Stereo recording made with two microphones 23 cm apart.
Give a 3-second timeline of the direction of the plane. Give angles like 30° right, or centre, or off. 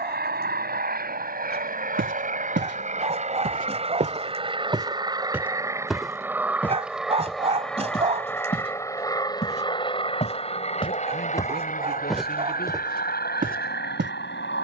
40° right, 20° right, centre, 20° left, 40° left.